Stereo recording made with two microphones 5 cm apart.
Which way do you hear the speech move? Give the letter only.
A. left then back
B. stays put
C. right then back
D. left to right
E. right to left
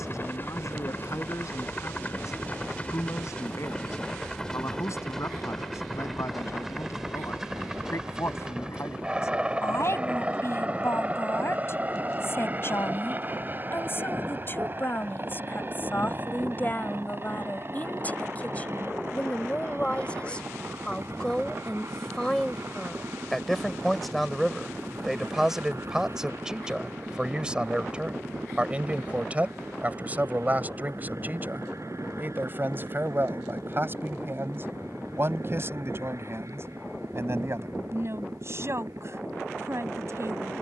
D.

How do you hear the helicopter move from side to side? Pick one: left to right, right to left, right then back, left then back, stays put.
left to right.